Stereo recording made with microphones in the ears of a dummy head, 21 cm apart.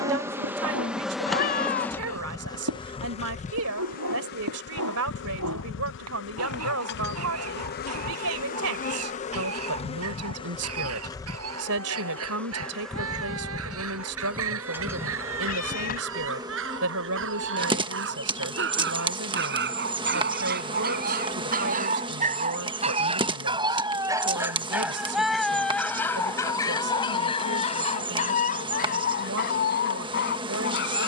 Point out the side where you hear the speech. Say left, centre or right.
right.